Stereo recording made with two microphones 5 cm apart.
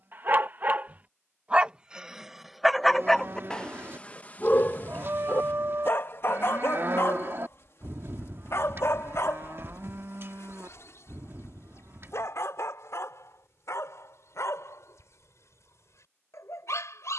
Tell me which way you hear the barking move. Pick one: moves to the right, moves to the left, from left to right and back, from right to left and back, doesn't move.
moves to the left.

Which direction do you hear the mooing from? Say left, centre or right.
right.